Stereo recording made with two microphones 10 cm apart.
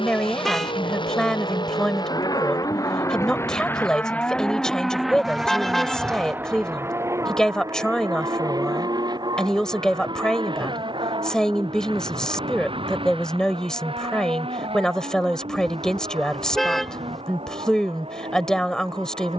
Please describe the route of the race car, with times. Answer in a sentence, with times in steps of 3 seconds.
In this clip you hear the race car on the left from 0 s, in the centre from 3 s and on the right from 6 s.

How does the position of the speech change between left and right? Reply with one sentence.
You can hear the speech stay in one place.